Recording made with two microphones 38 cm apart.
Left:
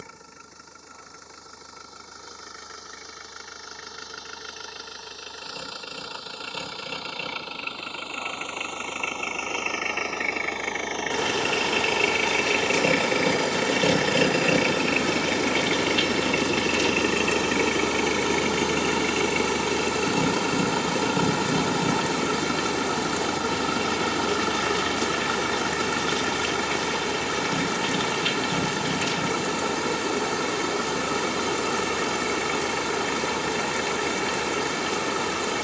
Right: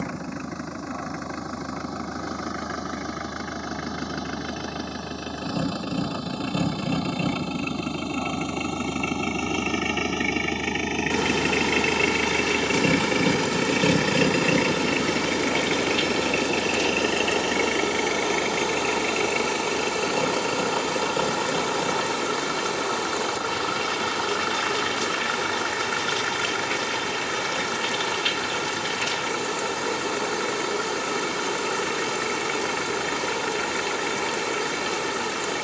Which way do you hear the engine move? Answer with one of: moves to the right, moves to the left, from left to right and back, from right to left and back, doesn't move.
moves to the left.